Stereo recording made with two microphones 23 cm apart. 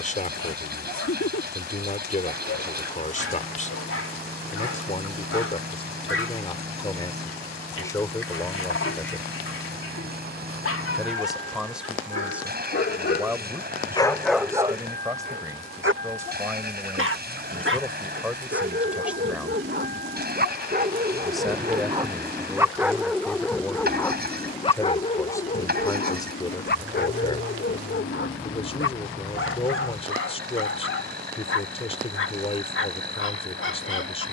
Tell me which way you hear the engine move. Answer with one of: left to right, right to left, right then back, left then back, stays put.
stays put.